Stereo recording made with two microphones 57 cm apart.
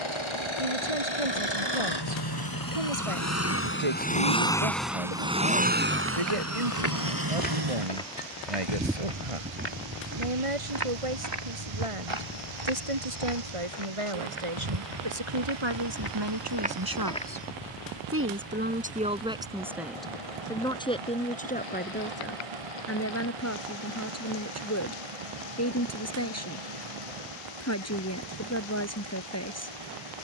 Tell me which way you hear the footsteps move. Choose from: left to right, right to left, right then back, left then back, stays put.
right then back.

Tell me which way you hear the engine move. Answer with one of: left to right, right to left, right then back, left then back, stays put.
left to right.